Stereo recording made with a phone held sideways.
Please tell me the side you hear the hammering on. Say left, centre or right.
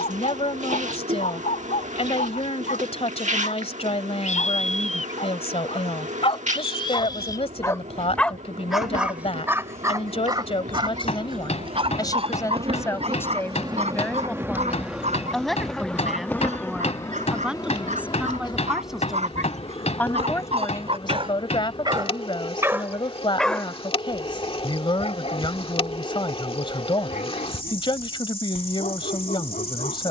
left.